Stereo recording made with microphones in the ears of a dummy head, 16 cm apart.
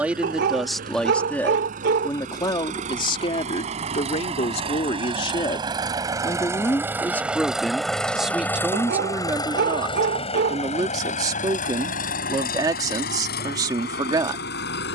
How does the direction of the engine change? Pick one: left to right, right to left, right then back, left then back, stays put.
right to left.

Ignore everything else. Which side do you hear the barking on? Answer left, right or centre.
right.